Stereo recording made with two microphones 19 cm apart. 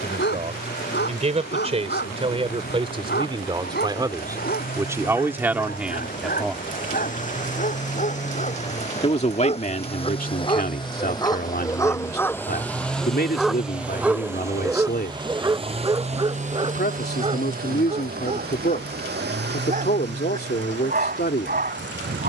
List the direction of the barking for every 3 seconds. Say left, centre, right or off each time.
left, left, left, left, centre, right, right, right.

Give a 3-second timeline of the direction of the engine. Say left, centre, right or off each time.
left, left, left, left, centre, right, right, right.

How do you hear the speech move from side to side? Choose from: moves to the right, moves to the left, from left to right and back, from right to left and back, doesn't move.
moves to the left.